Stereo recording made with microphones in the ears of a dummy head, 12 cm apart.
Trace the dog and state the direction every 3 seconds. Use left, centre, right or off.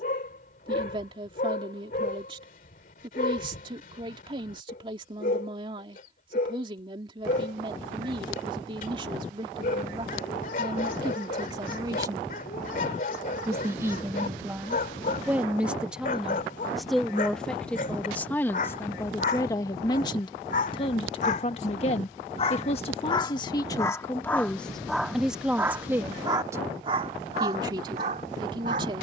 left, left, left, left, left, left, left, left, centre, right.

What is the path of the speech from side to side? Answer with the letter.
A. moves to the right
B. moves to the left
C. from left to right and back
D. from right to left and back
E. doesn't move
D.